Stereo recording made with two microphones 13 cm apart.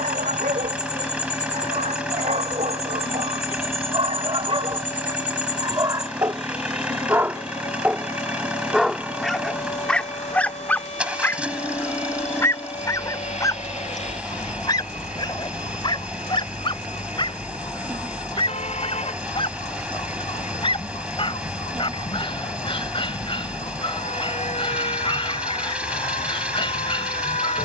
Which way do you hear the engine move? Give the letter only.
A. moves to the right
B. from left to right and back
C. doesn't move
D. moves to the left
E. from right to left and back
C.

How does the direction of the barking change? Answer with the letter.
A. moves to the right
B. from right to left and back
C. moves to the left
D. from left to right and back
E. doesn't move
C.